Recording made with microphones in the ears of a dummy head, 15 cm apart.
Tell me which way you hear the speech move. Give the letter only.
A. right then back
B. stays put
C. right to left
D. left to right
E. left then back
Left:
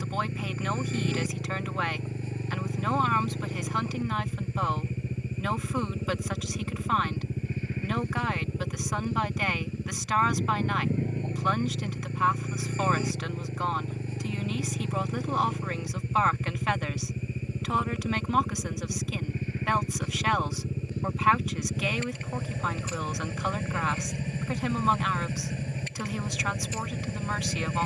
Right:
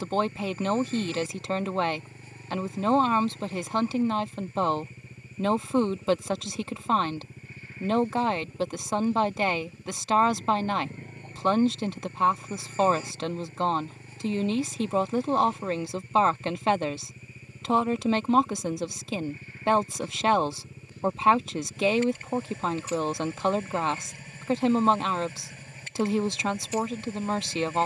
B.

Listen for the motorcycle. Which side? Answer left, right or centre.
left.